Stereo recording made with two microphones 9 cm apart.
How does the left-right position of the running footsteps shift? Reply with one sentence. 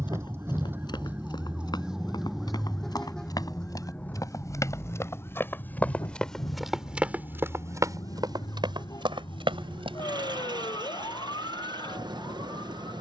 You can hear the running footsteps travel towards the right.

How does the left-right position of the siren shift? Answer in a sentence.
You can hear the siren travel towards the left.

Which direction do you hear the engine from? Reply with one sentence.
You can hear the engine on the right.